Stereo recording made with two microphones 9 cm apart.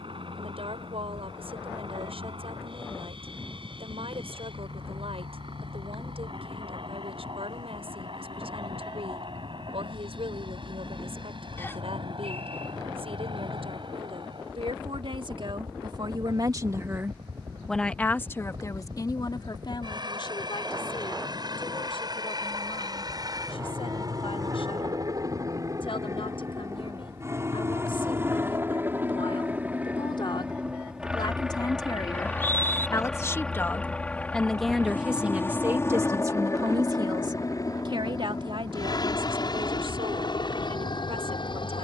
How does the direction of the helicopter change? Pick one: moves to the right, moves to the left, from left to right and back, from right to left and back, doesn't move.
moves to the left.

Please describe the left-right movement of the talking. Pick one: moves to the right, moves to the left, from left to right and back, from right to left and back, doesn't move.
from right to left and back.